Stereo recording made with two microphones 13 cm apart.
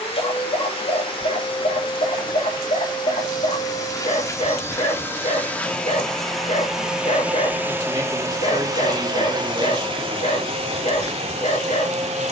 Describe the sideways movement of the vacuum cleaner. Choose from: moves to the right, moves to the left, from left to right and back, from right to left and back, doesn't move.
moves to the right.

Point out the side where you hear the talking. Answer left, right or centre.
right.